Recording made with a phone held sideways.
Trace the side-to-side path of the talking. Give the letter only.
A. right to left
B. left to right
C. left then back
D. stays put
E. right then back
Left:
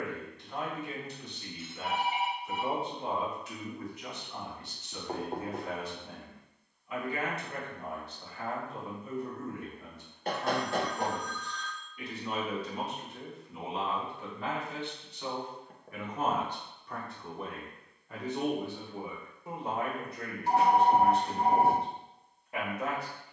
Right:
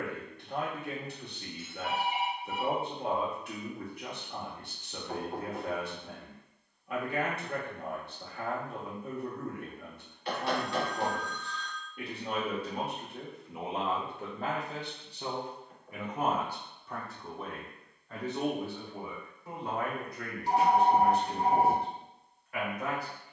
A.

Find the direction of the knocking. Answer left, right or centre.
left.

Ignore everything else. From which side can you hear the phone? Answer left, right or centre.
left.